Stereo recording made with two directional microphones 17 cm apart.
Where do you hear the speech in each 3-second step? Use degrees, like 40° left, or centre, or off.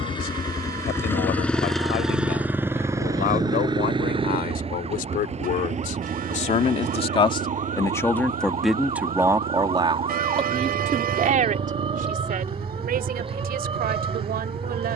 70° left, 60° left, 20° left, 30° right, 60° right.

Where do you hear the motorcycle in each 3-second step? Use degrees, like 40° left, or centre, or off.
10° left, 30° right, 50° right, 60° right, 60° right.